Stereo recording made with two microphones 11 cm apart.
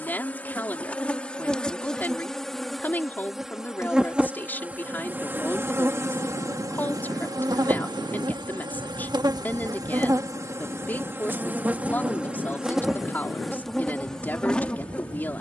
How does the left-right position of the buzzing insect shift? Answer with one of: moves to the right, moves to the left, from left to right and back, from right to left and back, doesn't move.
from left to right and back.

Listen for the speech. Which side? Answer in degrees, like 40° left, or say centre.
20° left.